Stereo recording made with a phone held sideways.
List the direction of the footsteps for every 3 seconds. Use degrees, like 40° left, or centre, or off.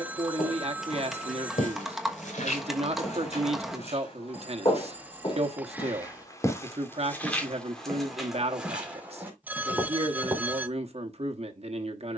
70° left, 40° left, 10° left, 20° right.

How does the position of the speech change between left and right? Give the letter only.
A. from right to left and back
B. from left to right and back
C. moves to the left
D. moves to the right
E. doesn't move
E.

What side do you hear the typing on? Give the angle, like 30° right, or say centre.
centre.